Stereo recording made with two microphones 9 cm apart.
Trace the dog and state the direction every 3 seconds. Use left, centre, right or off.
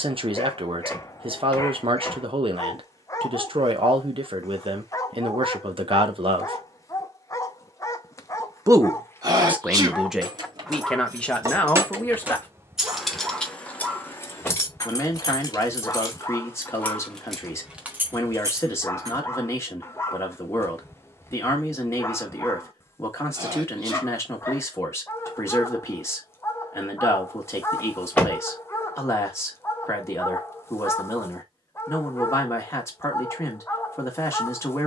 left, left, left, centre, centre, left, left, left, left, left, left, left.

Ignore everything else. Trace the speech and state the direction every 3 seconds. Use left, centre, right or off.
right, right, right, centre, left, left, left, left, left, left, left, left.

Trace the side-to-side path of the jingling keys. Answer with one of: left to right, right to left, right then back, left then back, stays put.
left then back.